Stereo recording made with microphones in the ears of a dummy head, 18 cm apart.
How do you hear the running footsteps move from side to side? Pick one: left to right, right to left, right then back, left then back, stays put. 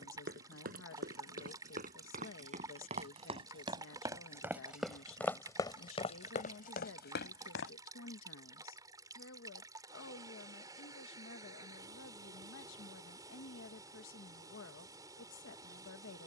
right to left.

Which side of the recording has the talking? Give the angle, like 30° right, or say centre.
70° left.